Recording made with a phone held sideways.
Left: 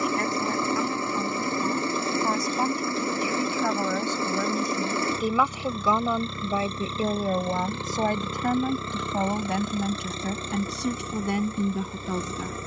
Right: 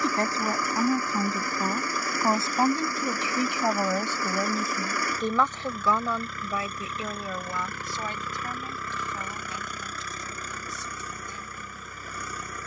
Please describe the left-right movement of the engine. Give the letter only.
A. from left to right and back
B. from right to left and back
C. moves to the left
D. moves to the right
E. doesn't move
E.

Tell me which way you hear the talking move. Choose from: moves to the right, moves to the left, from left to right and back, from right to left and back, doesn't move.
moves to the left.